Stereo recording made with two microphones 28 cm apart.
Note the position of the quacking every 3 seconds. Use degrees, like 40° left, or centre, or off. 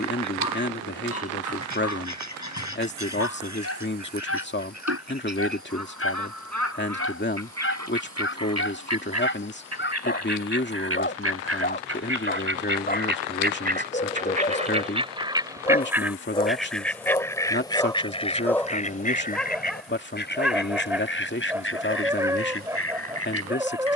80° right, 70° right, 70° right, 60° right, 30° right, centre, 30° left, 50° left.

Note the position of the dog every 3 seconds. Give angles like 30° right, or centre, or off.
60° left, 50° left, 50° left, 40° left, 30° left, 10° left, centre, 10° right.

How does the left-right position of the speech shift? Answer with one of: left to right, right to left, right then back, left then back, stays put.
stays put.